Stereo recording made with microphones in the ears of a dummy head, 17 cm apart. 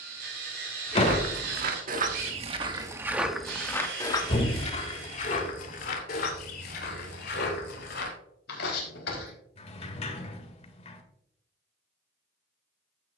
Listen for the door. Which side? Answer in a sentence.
You can hear the door on the left.